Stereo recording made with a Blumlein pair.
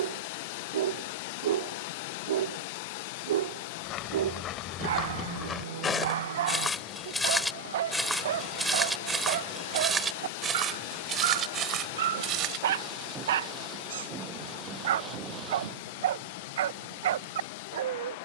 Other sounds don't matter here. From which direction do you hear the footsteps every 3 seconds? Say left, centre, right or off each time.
off, left, centre, right, right, off.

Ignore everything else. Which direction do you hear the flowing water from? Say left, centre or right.
left.